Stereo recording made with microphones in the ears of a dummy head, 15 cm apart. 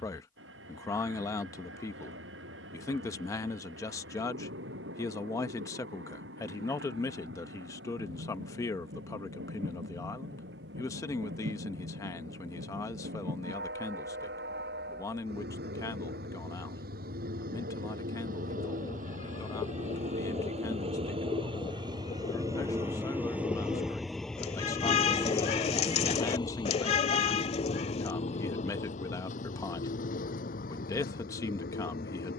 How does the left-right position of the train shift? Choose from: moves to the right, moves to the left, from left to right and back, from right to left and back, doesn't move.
moves to the left.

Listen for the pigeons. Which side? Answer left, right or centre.
left.